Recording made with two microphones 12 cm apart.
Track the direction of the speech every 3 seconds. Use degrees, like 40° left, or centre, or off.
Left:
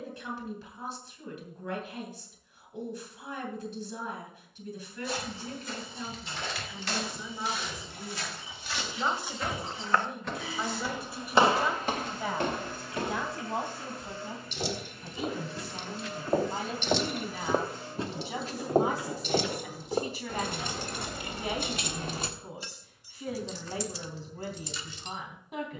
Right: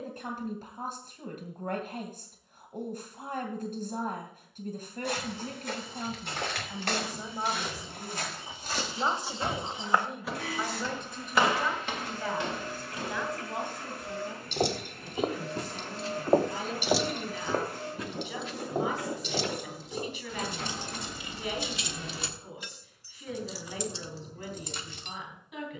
50° right, 50° right, 40° right, centre, 30° left, 40° left, 40° left, 40° left, 40° left.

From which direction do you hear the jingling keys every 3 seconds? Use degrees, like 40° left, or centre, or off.
off, off, off, off, 60° right, 20° right, 50° left, 30° left, 50° right.